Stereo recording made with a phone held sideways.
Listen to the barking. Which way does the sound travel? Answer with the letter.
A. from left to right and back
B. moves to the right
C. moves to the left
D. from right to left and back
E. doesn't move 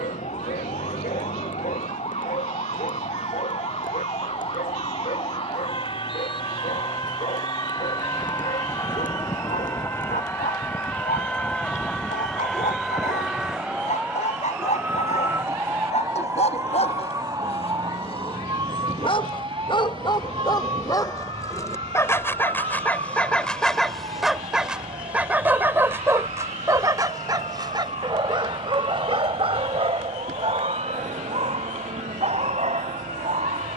B.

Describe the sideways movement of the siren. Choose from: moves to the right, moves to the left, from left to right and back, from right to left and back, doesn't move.
moves to the right.